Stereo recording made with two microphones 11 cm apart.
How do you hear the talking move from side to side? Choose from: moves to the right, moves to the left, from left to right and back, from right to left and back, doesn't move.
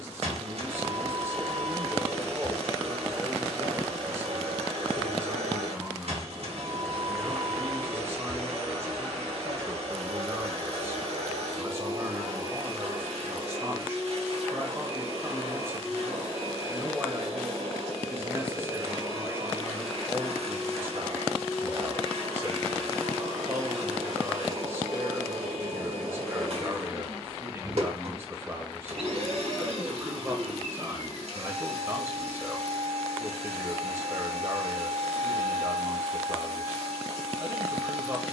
doesn't move.